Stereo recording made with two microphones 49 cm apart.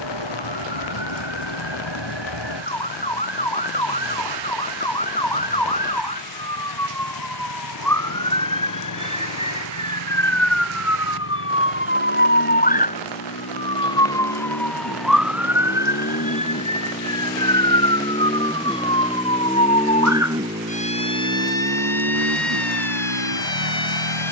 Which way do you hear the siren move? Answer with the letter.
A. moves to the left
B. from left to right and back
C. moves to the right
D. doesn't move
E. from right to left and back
C.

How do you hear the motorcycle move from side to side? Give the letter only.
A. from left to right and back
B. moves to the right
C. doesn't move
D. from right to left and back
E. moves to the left
B.